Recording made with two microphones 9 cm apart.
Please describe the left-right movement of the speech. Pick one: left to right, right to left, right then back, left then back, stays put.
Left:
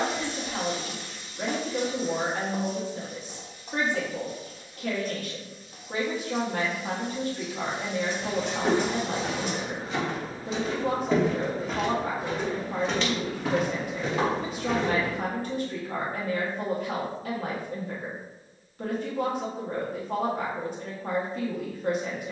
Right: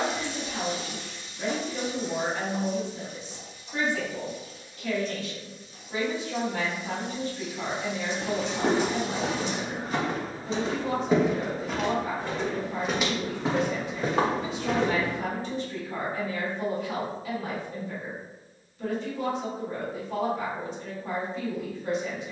stays put.